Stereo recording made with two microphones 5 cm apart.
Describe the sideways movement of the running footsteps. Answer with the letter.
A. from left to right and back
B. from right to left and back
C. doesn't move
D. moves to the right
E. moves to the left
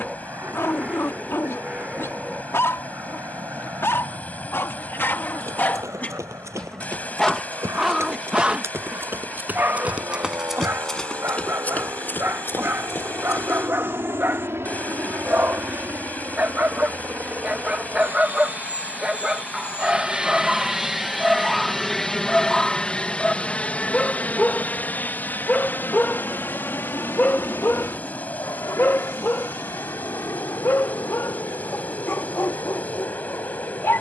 E.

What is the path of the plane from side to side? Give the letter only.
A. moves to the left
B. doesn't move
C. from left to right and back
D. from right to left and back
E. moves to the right
A.